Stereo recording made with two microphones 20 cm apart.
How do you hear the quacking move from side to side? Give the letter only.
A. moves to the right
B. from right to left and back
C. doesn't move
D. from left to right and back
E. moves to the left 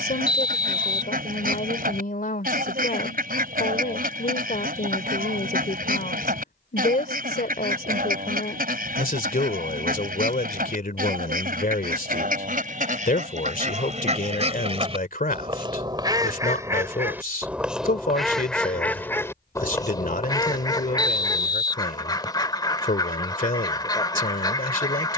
E.